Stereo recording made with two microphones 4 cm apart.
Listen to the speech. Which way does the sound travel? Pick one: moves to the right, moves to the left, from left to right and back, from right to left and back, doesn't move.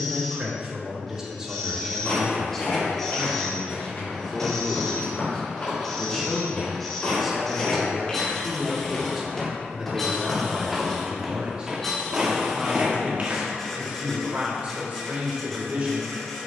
from right to left and back.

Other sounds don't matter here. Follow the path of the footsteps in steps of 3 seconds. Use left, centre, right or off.
left, left, left, centre, right, off.